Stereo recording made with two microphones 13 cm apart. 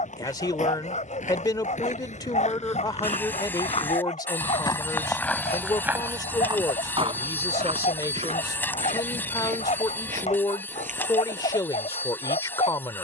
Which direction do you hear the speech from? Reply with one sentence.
In this clip you hear the speech on the left.